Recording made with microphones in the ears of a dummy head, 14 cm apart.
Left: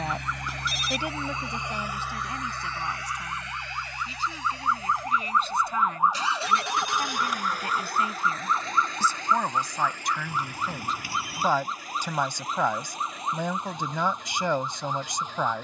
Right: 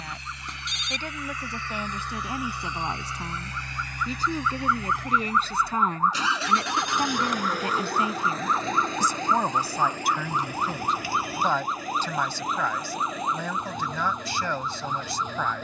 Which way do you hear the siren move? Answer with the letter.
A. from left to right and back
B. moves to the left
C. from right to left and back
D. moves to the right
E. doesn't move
D.